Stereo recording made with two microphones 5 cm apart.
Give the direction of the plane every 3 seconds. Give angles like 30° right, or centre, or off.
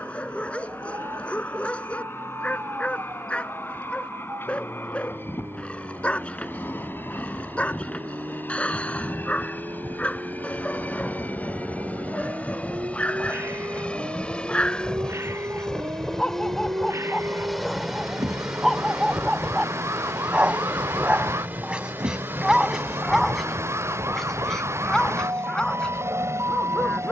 50° left, 50° left, 50° left, 40° left, 30° left, 10° left, 20° right, 40° right, 50° right.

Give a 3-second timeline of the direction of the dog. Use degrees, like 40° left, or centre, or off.
20° left, 20° left, 20° left, 20° left, 20° left, 10° left, 10° right, 10° right, 10° left.